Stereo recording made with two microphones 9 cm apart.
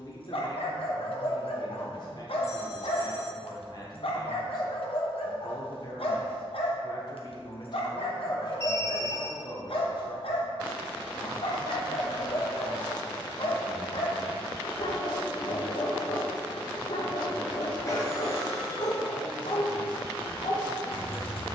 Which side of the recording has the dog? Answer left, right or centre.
left.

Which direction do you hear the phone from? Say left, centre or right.
left.